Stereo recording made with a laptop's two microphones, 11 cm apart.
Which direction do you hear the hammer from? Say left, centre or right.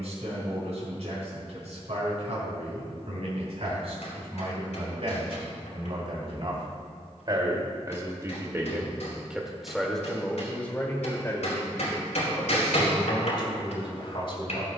left.